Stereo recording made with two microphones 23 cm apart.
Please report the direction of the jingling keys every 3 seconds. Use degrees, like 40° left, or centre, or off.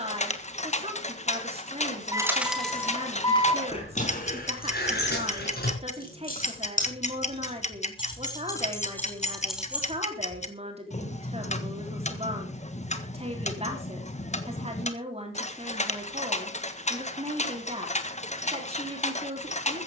centre, 30° left, 30° left, centre, off, off, off.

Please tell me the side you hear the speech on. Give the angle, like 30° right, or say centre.
30° right.